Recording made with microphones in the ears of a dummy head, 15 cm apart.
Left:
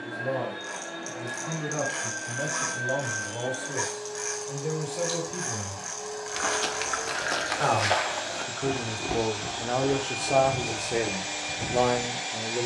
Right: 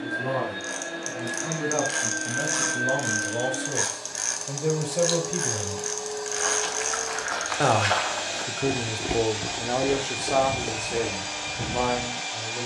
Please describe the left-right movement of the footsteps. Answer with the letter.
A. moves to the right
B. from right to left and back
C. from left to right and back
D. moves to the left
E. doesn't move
A.